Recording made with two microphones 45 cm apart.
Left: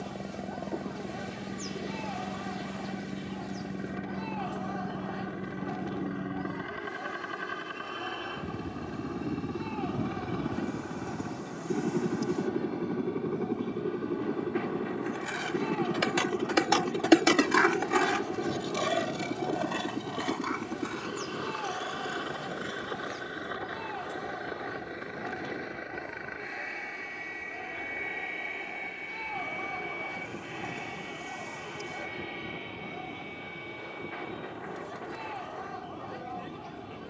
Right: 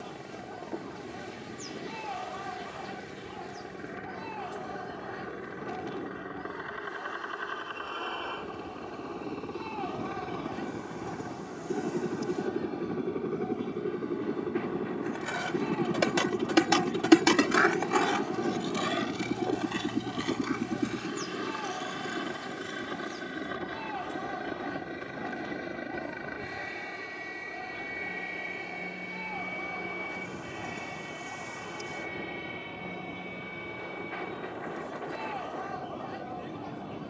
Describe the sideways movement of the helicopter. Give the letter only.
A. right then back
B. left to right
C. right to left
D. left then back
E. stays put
B.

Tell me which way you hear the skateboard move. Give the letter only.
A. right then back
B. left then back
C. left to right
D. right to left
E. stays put
D.